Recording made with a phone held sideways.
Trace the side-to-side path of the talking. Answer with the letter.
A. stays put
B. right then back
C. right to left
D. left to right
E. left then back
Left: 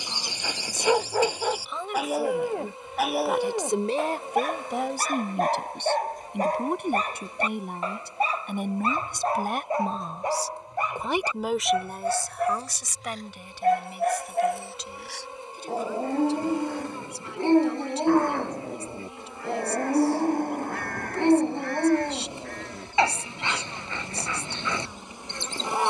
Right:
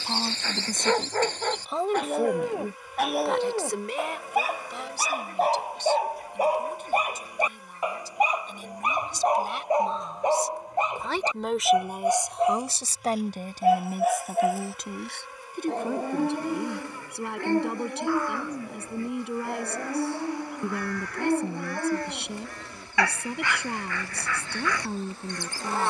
E.